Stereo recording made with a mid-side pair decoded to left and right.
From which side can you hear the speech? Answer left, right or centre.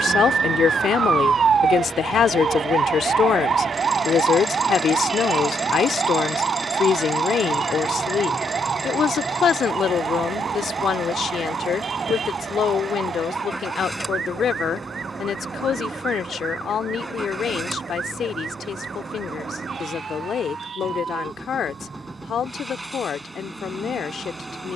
left.